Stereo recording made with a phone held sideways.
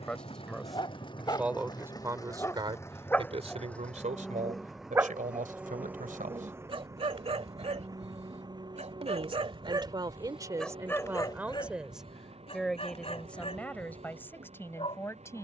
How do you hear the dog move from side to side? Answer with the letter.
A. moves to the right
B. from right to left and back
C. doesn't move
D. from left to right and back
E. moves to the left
D.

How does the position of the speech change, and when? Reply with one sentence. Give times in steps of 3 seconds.
You can hear the speech in the centre from 0 s, on the right from 3 s and in the centre from 12 s.